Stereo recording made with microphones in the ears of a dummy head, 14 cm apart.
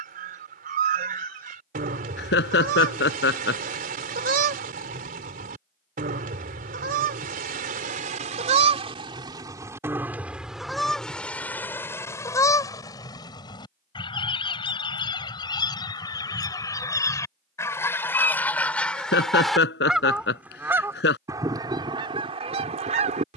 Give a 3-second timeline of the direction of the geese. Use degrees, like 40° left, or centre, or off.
60° right, 60° right, 50° right, 10° right, 30° left, 20° left, centre, 40° right.